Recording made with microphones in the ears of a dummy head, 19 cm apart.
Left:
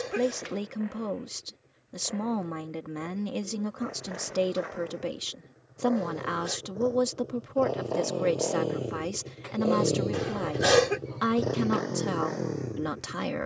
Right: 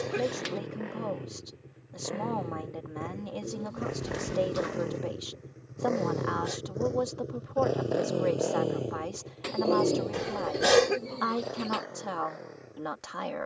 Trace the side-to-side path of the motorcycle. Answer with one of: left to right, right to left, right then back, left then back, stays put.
right to left.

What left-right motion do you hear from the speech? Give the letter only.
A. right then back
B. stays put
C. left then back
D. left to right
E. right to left
B.